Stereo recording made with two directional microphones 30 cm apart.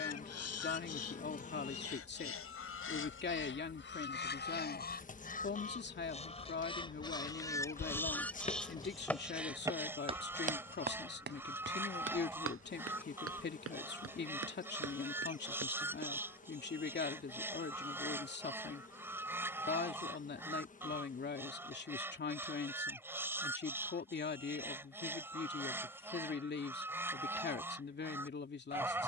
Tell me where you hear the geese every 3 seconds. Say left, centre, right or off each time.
left, left, centre, centre, centre, centre, centre, centre, centre, centre.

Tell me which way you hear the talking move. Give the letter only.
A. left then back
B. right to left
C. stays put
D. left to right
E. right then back
C.